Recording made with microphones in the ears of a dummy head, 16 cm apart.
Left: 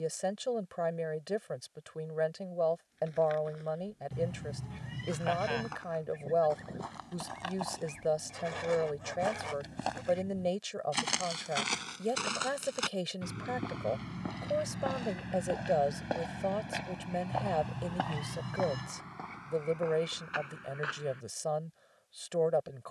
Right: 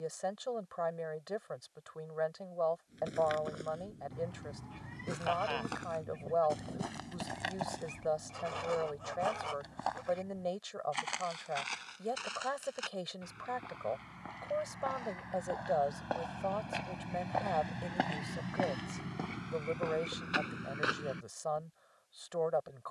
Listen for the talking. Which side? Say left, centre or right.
left.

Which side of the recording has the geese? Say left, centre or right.
centre.